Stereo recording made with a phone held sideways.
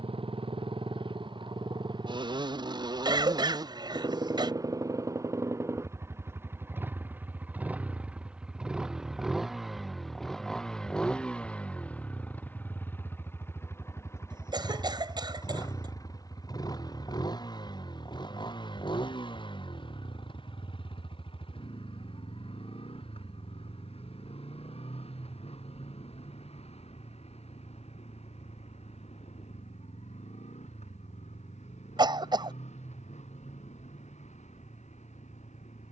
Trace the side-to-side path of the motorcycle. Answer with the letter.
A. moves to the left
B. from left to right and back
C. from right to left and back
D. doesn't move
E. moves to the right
A.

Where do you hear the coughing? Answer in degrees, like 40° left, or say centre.
40° right.